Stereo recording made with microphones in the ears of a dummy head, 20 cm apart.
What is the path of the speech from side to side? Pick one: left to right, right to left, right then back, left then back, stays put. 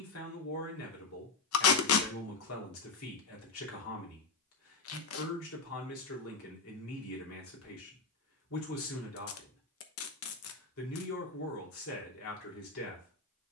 stays put.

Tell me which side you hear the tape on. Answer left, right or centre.
left.